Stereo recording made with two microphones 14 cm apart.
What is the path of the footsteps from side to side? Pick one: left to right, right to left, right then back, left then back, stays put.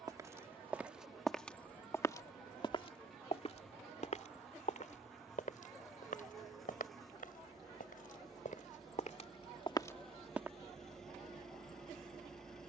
left then back.